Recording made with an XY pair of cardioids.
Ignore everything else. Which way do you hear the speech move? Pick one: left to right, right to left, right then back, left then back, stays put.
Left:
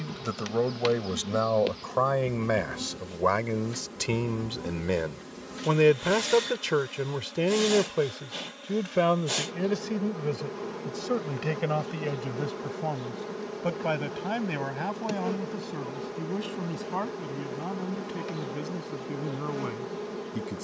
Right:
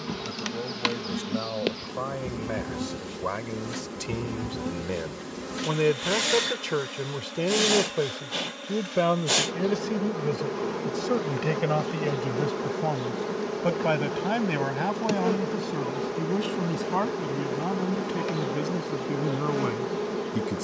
left to right.